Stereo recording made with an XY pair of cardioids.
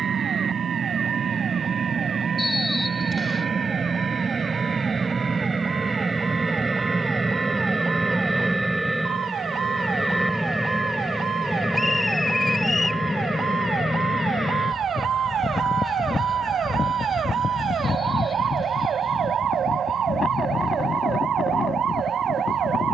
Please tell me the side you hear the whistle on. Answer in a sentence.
You can hear the whistle on the left.